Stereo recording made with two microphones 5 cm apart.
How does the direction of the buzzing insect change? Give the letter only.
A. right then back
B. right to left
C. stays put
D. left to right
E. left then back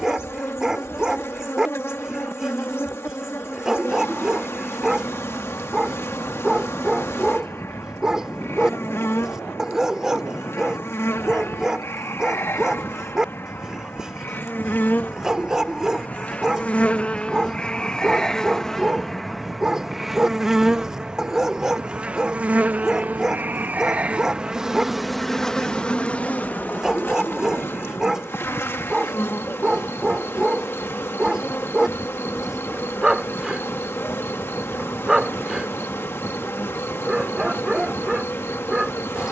A.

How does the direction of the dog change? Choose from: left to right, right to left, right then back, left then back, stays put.
stays put.